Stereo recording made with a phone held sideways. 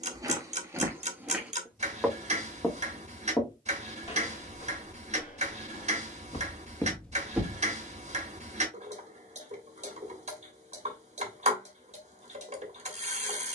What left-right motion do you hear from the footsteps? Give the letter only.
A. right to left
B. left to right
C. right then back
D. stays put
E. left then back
E.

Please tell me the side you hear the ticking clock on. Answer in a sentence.
In this clip you hear the ticking clock on the right.